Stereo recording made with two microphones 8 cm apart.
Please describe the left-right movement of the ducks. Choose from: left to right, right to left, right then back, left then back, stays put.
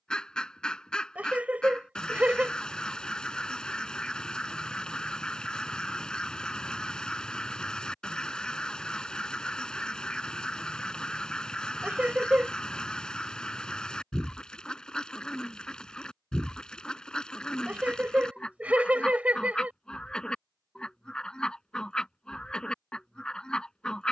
stays put.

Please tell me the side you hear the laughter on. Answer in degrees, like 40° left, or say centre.
20° right.